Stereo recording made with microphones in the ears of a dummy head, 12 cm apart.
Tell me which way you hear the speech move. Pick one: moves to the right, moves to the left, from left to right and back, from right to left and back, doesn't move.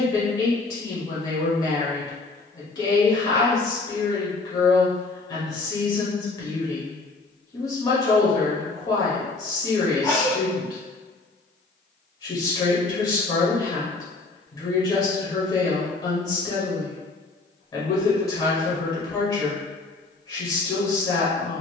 doesn't move.